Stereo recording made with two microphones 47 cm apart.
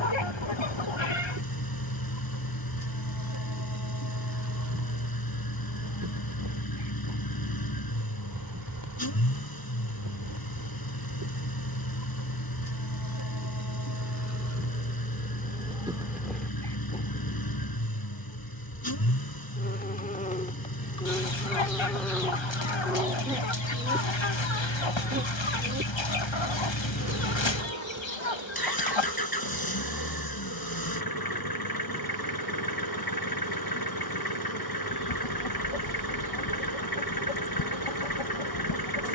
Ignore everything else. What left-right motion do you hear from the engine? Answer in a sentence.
You can hear the engine stay in one place.